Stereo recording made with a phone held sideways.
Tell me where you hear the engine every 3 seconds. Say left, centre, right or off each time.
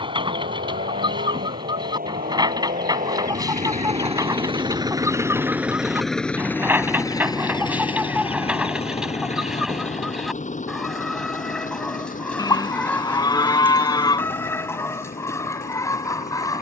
right, right, left, left, left, left.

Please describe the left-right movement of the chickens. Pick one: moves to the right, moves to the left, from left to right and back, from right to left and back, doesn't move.
moves to the left.